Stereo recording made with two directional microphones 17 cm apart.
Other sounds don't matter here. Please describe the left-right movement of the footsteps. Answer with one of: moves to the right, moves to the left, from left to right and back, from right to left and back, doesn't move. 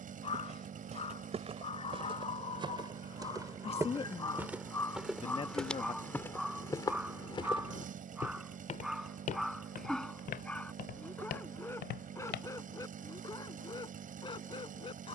moves to the left.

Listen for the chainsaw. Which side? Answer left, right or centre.
right.